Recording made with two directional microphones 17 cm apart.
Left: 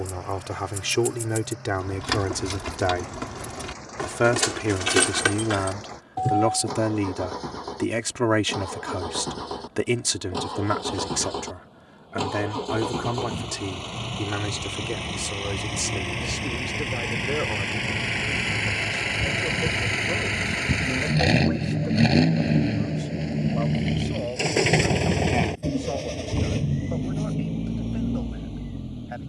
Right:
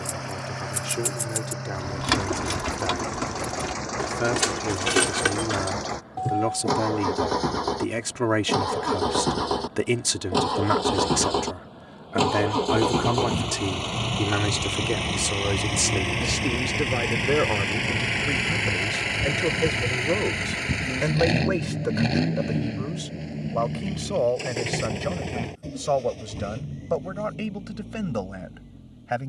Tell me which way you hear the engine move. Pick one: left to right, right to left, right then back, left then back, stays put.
right to left.